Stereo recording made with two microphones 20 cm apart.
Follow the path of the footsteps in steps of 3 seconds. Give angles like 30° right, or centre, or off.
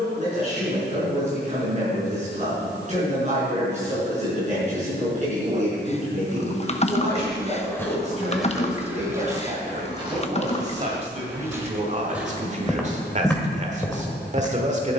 off, off, centre, 20° right, 10° left.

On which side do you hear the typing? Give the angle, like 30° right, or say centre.
40° left.